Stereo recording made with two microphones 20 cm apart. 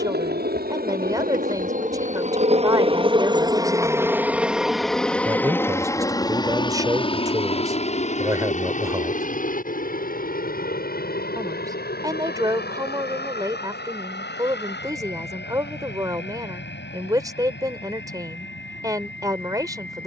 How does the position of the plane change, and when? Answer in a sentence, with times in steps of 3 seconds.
In this clip you hear the plane on the right from 0 s, in the centre from 3 s and on the left from 6 s.